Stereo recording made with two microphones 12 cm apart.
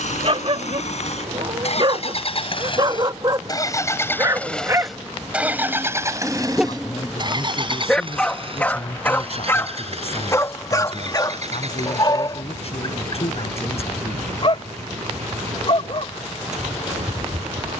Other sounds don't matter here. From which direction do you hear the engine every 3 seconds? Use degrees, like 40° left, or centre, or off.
60° left, 10° left, 40° right, 60° right, 60° right, 70° right.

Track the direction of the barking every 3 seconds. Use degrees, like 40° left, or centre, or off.
50° right, 30° right, centre, 30° left, 40° left, 50° left.